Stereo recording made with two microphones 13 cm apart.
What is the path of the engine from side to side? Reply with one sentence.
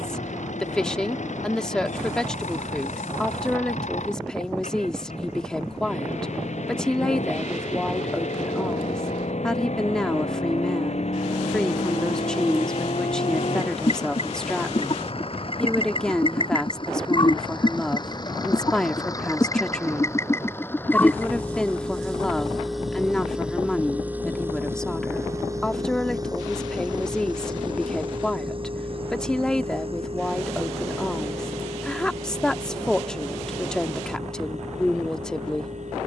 You can hear the engine move from left to right.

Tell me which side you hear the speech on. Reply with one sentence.
In this clip you hear the speech in the centre.